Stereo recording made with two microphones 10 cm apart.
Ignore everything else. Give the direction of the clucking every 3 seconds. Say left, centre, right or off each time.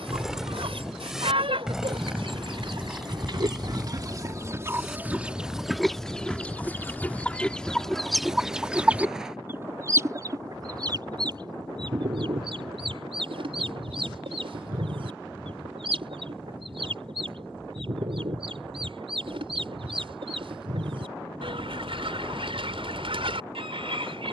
right, right, centre, right, right, right, right, right.